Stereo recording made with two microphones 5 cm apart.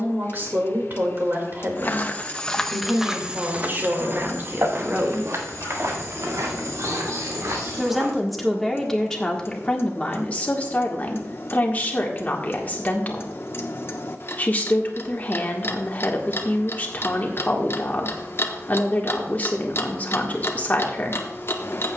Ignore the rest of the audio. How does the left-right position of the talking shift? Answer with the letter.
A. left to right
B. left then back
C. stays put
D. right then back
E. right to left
E.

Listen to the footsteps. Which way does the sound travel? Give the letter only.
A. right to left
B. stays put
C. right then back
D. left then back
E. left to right
E.